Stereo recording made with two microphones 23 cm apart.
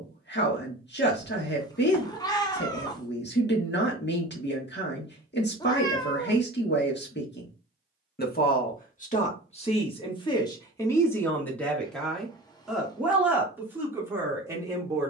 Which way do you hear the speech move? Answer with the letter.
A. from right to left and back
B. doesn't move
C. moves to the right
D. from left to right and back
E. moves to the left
C.